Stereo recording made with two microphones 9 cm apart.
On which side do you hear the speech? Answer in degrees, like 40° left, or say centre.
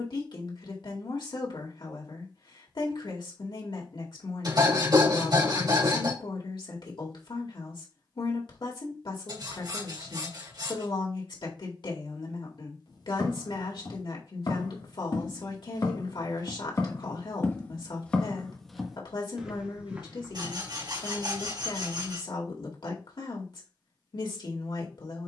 70° left.